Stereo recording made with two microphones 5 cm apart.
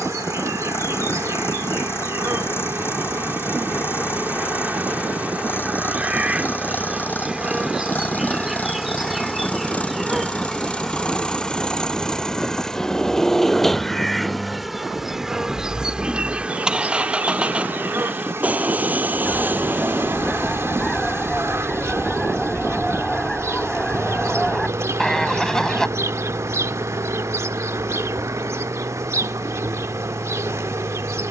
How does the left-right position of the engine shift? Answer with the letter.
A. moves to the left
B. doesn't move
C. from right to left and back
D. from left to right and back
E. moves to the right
E.